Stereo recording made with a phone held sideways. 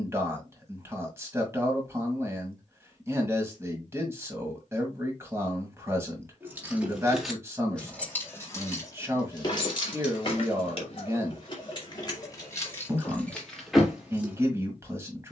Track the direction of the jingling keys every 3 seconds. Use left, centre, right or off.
off, off, centre, left, centre.